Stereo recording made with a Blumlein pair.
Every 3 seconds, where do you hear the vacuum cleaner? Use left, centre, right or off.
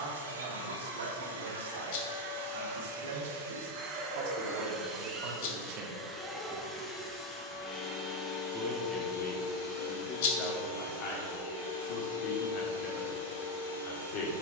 right, right, centre, left, left.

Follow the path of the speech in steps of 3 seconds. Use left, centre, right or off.
right, right, centre, left, left.